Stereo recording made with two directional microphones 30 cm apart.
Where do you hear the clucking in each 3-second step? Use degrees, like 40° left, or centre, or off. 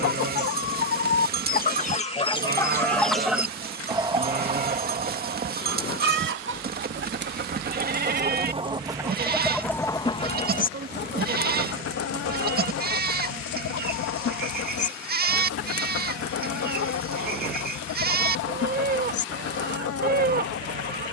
30° left, 20° right, 30° right, 20° left, 50° left, 50° left, 50° left.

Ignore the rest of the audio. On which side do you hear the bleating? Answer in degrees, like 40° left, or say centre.
30° right.